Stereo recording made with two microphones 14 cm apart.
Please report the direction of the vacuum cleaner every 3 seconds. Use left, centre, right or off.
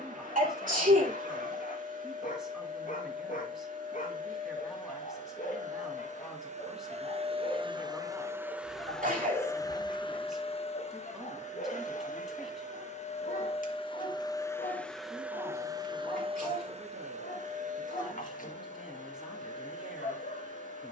right, right, right, left, left, right, right.